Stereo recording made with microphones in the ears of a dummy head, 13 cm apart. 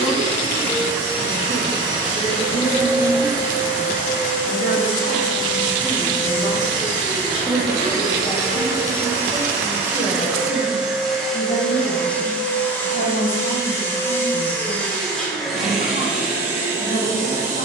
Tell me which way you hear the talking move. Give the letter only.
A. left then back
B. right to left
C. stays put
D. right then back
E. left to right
B.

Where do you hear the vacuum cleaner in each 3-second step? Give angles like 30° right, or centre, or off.
30° right, 30° right, 30° right, 10° right, 10° left, 10° right.